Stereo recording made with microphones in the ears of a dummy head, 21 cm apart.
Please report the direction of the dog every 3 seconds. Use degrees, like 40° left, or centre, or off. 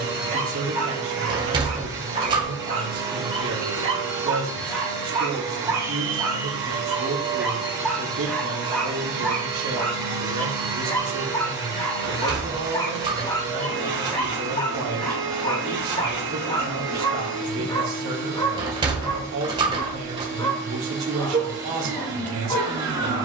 30° right, 20° right, centre, 10° left, 20° left, 20° left, 20° left, 20° left.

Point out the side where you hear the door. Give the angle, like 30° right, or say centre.
20° right.